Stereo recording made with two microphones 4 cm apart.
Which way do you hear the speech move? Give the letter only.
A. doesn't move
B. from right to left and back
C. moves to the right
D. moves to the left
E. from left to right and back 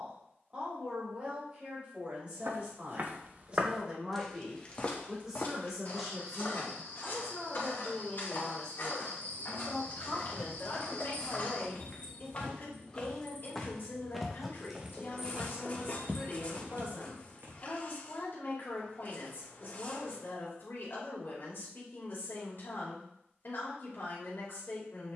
D.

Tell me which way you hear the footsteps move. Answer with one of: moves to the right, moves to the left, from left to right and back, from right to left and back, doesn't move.
from right to left and back.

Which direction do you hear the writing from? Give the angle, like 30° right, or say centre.
40° left.